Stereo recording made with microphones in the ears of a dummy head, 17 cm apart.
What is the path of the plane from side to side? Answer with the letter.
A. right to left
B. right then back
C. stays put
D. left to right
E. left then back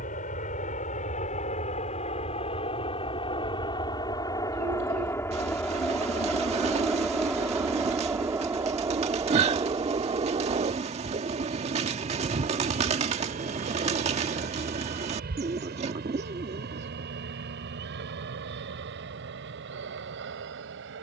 D.